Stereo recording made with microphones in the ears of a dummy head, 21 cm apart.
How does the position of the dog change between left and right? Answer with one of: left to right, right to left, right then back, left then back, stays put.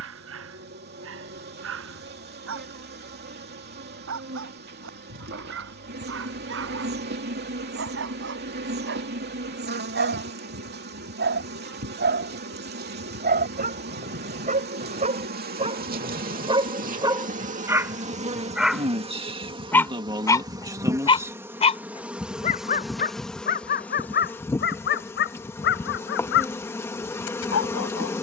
right to left.